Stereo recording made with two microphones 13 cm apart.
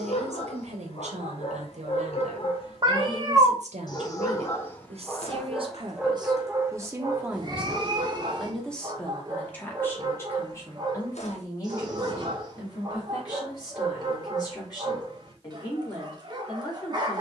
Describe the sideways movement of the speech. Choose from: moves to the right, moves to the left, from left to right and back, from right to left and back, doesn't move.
moves to the left.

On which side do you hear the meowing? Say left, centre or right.
right.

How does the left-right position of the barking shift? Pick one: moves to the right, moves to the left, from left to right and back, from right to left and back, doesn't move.
moves to the right.